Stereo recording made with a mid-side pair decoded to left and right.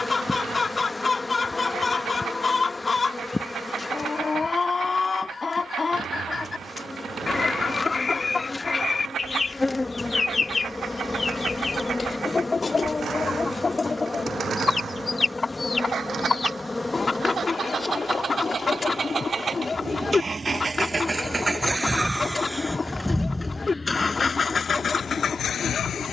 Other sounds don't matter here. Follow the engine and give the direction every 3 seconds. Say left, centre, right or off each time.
right, right, right, right, right, right, right, centre, left.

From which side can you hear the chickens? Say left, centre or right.
left.